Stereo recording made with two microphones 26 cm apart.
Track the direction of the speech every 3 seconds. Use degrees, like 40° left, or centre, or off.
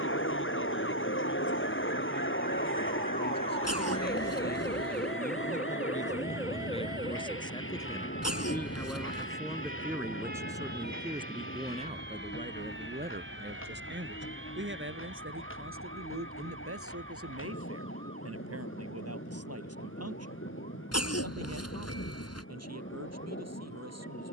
50° left, 40° left, 20° left, 10° right, 40° right, 60° right, 70° right, 80° right.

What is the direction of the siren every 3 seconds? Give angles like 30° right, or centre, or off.
40° left, 10° left, 20° right, 40° right, 50° right, 50° right, 60° right, 60° right.